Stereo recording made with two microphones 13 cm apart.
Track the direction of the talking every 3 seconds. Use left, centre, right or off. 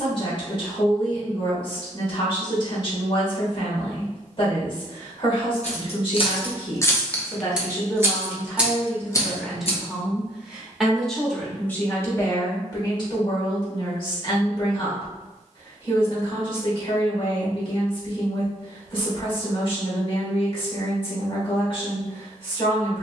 left, left, left, centre, left, left, left, left.